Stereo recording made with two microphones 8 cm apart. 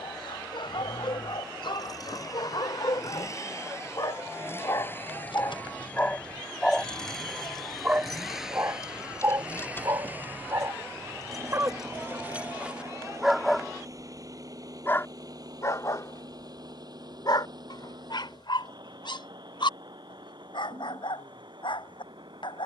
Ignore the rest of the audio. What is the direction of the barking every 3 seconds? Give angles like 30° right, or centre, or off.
70° left, 50° left, 10° right, 40° right, 10° right, 50° left, 70° left, 70° left.